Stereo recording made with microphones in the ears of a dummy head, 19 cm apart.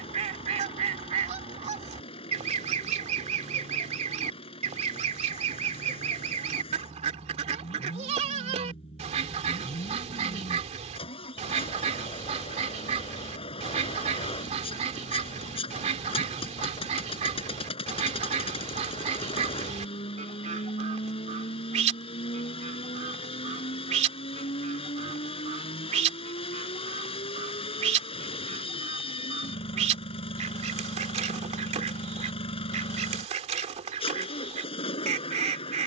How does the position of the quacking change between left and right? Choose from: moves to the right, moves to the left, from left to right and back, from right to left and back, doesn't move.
doesn't move.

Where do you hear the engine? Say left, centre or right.
left.